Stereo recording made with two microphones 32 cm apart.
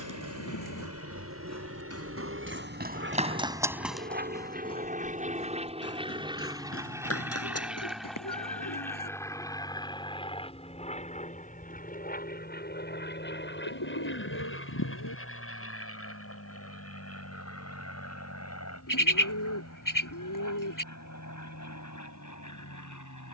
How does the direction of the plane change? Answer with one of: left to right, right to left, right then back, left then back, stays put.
right to left.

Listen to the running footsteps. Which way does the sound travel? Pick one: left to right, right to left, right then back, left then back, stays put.
right to left.